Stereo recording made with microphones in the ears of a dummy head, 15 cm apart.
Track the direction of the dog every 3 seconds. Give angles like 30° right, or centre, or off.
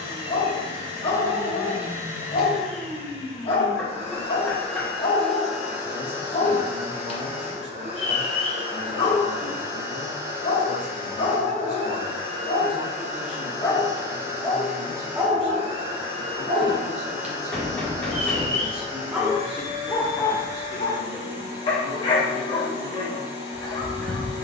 40° left, 40° left, 40° left, 40° left, 20° left, 20° right, centre, 30° left.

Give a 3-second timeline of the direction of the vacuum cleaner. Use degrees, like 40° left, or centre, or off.
30° right, 10° left, 30° right, 50° right, 50° right, 50° right, 50° right, 50° right.